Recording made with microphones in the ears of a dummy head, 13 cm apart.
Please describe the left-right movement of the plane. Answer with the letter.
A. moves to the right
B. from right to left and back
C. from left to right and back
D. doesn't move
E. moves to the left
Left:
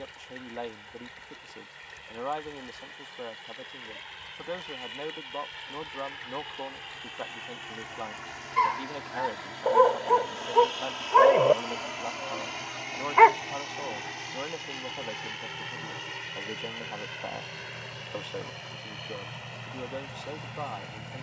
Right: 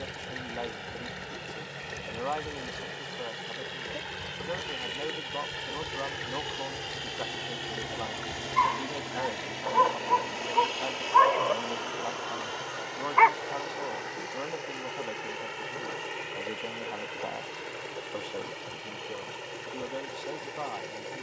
E.